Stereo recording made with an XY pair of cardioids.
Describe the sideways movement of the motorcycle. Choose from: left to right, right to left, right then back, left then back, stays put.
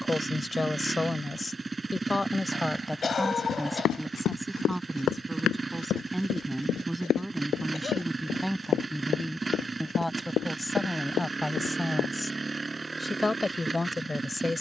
stays put.